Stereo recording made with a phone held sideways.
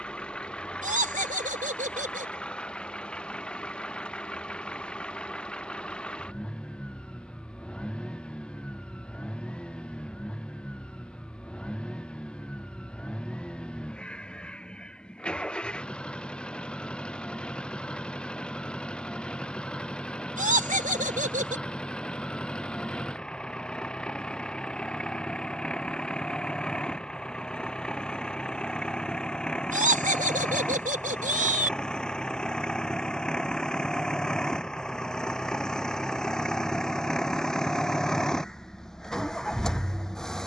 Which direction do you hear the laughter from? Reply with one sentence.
In this clip you hear the laughter on the right.